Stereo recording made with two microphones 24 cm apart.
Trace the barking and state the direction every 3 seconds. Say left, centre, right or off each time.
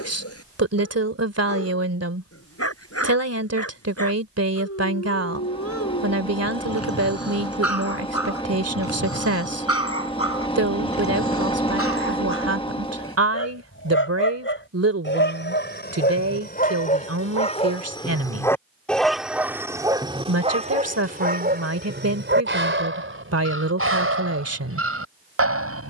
left, left, left, left, left, left, centre, right, right.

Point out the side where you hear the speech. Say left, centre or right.
right.